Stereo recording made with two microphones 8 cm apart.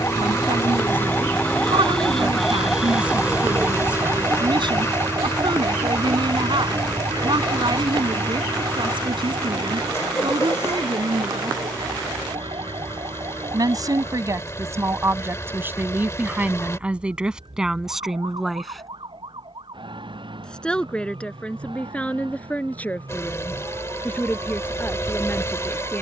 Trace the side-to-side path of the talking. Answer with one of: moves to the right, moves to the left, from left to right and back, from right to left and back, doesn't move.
moves to the left.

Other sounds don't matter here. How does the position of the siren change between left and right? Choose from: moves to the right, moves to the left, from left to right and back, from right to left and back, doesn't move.
moves to the right.